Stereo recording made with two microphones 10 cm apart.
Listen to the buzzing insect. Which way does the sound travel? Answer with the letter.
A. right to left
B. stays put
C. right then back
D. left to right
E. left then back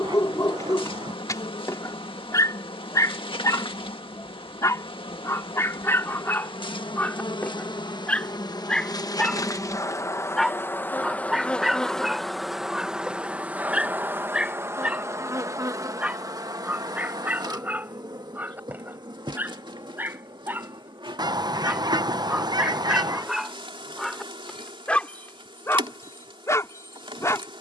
D.